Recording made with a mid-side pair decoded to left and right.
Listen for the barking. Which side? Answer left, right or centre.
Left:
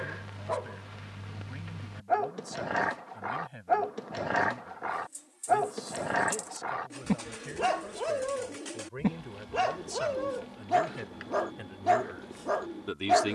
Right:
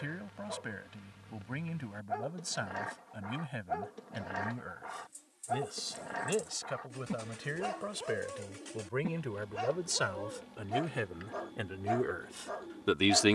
left.